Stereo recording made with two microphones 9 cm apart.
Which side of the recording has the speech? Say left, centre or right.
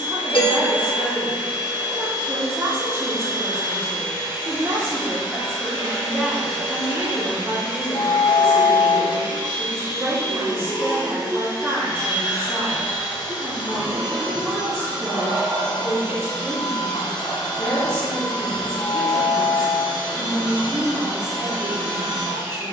right.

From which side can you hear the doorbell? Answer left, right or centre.
left.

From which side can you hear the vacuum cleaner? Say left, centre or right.
left.